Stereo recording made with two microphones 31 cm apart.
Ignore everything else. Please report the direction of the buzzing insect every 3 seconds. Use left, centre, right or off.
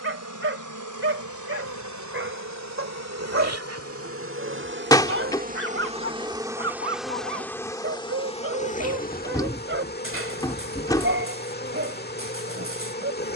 right, right, centre, left, left.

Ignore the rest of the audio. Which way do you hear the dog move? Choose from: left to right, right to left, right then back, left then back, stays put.
stays put.